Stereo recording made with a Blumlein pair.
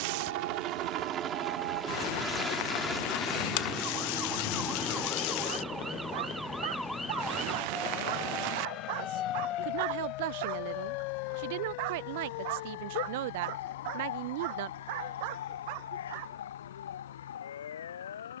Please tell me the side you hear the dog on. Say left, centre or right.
right.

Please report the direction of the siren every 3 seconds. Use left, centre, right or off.
right, right, centre, left, left, left.